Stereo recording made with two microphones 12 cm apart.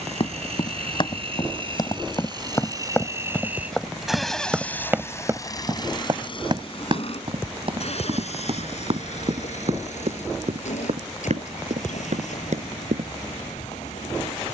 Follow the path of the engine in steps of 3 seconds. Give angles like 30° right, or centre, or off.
40° right, 10° left, 50° left, 70° left, 80° left.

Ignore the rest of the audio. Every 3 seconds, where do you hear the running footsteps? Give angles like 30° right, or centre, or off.
30° left, 10° right, 50° right, 60° right, 70° right.